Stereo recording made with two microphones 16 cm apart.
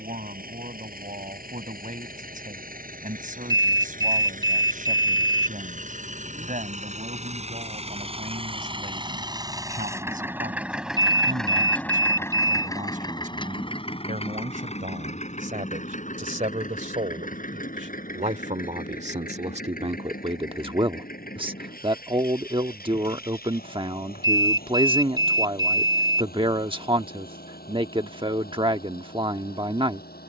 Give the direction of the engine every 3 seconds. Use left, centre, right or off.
right, right, right, centre, left, left, left, left, left, left.